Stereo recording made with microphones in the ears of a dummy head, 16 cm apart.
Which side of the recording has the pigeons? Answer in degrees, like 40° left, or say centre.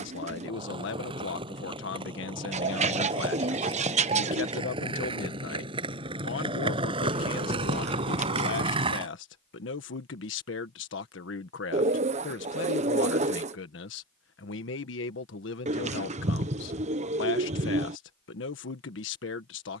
40° right.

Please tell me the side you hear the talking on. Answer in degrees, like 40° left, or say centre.
70° left.